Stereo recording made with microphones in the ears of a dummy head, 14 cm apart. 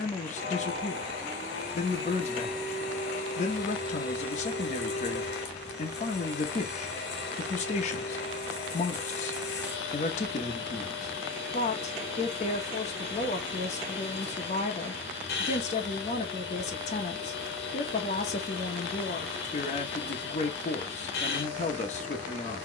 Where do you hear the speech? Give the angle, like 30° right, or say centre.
50° left.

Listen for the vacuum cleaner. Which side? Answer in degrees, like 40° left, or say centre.
80° left.